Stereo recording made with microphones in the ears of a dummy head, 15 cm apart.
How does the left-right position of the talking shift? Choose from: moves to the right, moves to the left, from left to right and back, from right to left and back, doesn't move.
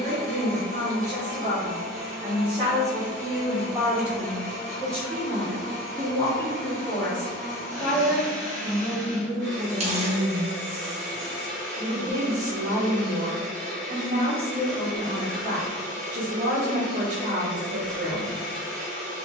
from right to left and back.